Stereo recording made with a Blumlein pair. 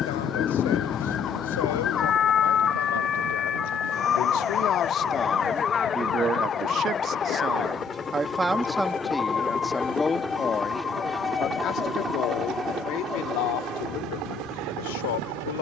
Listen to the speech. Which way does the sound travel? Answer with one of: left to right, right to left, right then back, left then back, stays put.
right then back.